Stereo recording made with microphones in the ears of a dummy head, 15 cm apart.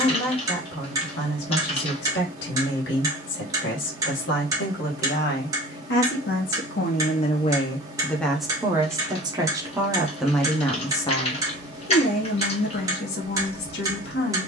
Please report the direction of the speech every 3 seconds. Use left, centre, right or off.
left, left, left, centre, left.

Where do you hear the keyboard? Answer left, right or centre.
left.